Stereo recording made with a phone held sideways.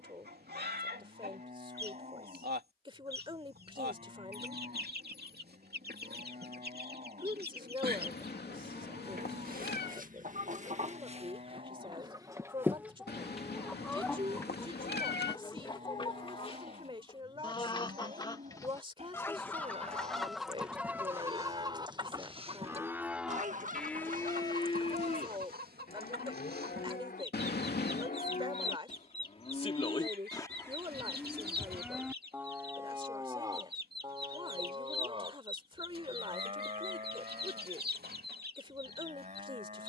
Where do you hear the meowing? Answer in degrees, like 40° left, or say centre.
80° left.